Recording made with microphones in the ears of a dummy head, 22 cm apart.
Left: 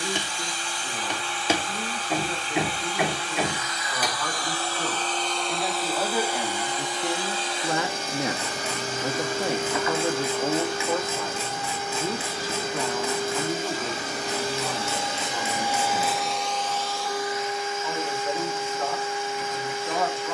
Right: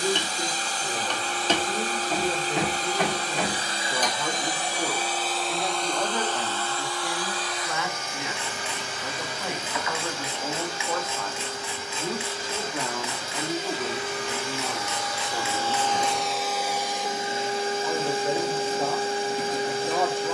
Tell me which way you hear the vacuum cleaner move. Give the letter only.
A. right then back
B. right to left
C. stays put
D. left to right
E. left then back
E.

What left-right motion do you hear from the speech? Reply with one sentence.
You can hear the speech move from right to left and back again.